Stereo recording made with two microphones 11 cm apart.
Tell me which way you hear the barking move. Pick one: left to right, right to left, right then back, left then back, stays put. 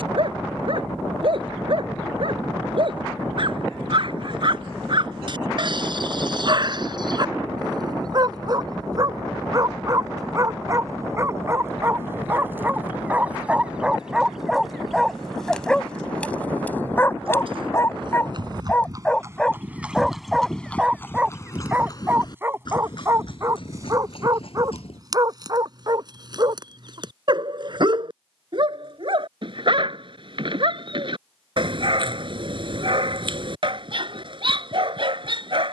left then back.